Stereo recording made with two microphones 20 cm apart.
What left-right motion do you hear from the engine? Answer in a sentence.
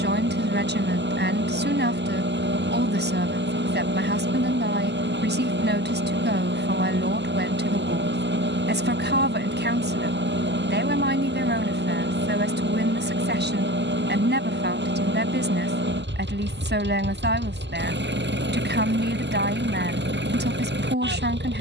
In this clip you hear the engine stay in one place.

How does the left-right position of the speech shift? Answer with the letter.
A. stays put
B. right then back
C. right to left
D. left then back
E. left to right
A.